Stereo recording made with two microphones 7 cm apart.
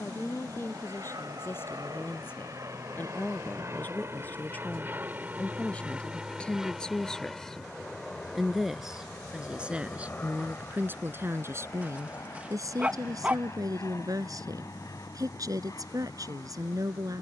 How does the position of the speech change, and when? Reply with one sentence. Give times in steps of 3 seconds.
In this clip you hear the speech on the left from 0 s, in the centre from 6 s and on the right from 9 s.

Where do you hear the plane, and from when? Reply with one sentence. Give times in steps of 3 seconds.
In this clip you hear the plane on the right from 0 s, in the centre from 6 s and on the left from 9 s.